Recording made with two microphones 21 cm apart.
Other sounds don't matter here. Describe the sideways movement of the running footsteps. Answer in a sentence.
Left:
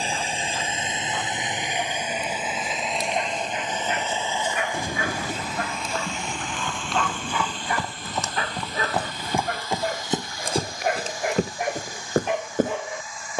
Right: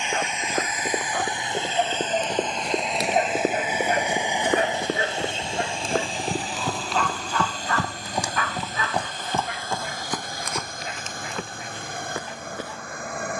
In this clip you hear the running footsteps go from the right side to the left.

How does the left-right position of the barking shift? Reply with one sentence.
You can hear the barking move from right to left.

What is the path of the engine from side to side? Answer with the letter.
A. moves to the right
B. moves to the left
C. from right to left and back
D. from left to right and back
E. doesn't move
A.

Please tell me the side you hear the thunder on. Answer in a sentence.
You can hear the thunder on the left.